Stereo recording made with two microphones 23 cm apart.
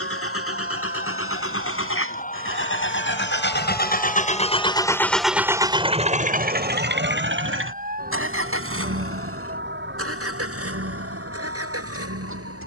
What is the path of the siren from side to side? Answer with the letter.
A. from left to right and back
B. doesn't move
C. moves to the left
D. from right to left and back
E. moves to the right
E.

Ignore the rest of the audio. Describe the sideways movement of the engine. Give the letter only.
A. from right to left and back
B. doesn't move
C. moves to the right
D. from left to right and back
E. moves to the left
C.